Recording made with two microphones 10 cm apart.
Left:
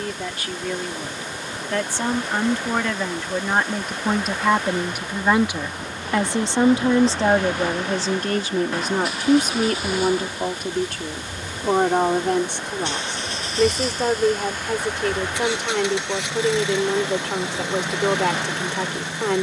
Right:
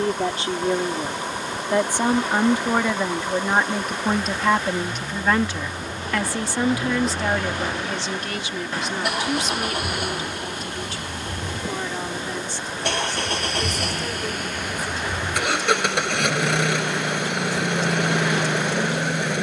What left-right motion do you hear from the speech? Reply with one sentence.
In this clip you hear the speech move from right to left.